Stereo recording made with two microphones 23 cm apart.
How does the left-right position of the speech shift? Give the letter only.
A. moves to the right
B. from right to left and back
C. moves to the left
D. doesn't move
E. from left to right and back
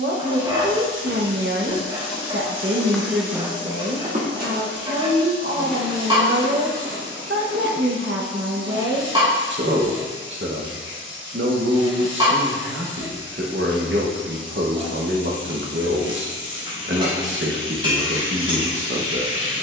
D.